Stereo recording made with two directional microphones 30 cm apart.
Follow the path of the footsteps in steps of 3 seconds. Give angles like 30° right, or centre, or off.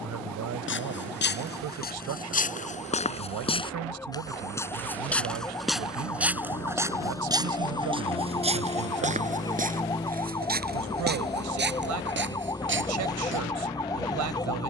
30° left, 10° left, 10° right, 30° right, 40° right.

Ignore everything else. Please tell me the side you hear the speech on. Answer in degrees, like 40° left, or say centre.
70° right.